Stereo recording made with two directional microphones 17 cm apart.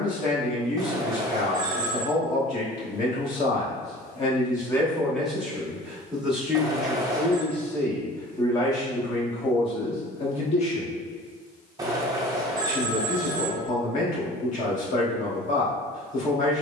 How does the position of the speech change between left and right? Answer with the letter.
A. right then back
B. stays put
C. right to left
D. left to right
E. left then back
A.